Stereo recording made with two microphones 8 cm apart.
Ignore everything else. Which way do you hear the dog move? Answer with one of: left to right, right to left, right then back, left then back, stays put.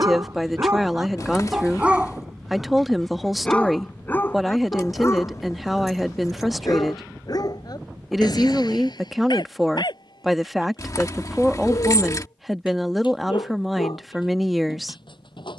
right to left.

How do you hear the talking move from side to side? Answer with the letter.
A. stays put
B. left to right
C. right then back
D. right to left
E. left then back
A.